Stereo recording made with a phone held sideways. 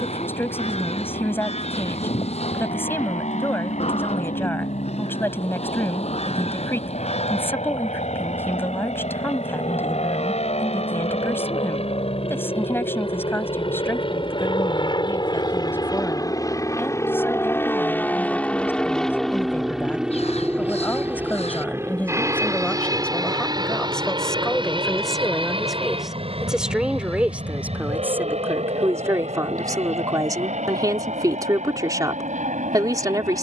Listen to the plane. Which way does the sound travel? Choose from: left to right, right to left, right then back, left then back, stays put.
left to right.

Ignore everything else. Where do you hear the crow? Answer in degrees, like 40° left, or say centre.
50° left.